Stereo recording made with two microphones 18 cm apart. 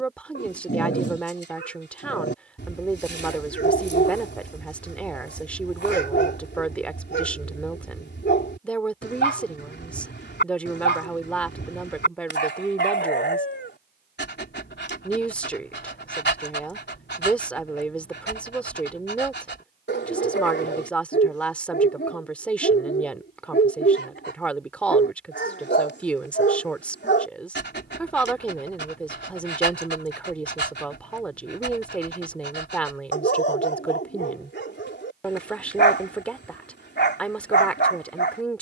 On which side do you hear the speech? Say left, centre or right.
centre.